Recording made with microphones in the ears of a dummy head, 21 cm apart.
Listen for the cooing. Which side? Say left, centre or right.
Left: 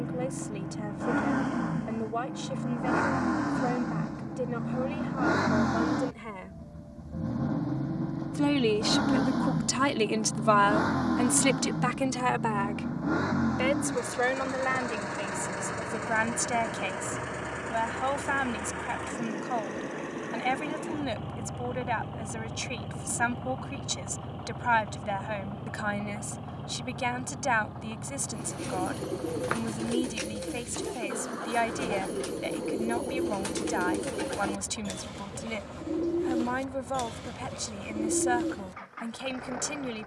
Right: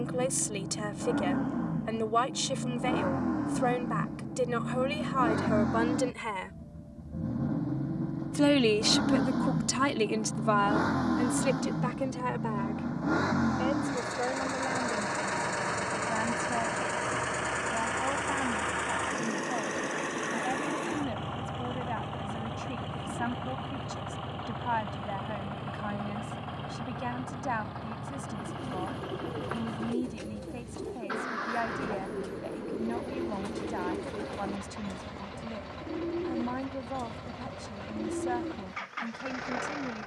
left.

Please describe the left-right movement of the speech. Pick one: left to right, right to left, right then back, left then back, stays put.
right to left.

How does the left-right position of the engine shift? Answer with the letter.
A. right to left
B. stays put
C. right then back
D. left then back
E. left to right
E.